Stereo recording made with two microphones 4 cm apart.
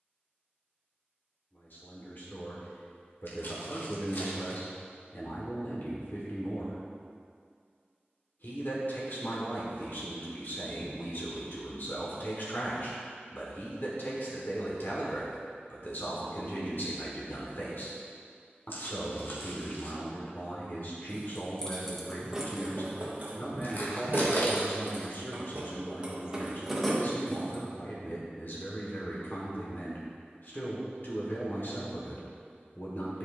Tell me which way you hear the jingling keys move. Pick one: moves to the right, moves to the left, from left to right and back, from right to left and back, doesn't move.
from left to right and back.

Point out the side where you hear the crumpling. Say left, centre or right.
left.